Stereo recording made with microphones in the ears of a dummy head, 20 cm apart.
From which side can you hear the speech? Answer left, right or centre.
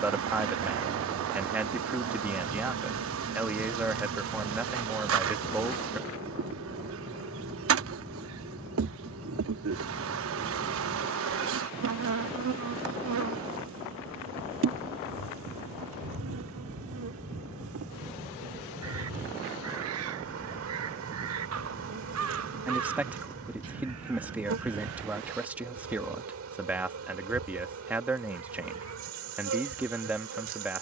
centre.